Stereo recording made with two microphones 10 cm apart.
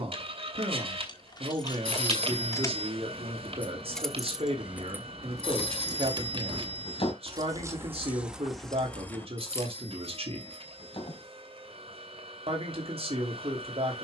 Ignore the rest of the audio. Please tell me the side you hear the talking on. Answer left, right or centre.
right.